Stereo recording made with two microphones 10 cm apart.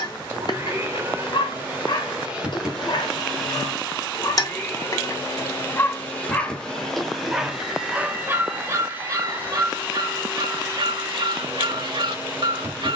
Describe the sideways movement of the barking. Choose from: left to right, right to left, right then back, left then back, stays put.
left to right.